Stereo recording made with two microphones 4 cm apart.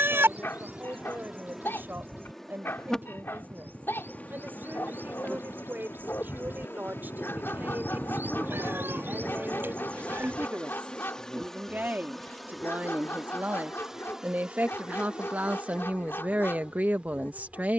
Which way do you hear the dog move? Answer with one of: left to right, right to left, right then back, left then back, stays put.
stays put.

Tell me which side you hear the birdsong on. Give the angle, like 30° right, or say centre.
60° right.